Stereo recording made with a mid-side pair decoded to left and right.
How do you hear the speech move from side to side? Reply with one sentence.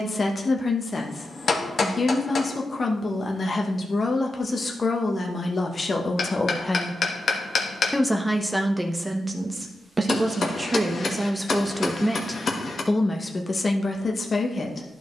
In this clip you hear the speech go right and come back.